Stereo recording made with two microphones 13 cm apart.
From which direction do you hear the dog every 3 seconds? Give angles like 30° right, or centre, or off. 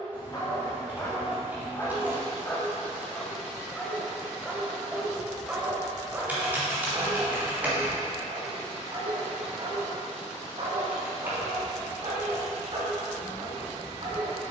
20° left, centre, 30° right, 50° right, 50° right.